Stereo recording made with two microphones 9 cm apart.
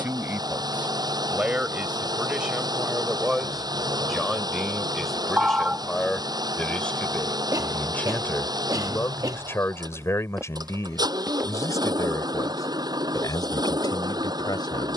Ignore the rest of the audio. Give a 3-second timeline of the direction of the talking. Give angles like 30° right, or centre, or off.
10° right, centre, 20° left, 30° left, 50° left.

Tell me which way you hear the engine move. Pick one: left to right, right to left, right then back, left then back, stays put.
stays put.